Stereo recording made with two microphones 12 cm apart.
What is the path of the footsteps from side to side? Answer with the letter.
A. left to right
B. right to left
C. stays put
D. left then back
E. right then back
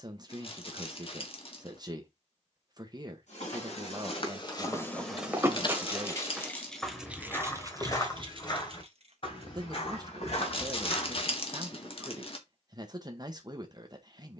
E.